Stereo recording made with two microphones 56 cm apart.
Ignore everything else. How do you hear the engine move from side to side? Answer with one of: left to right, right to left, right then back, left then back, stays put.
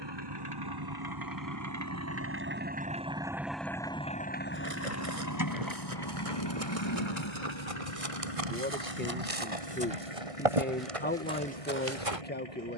right to left.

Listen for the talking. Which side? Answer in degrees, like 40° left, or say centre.
20° left.